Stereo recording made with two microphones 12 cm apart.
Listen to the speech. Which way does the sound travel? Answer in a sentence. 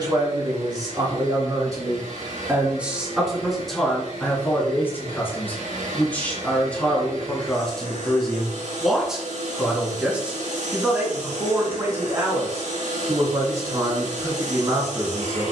You can hear the speech move from right to left and back again.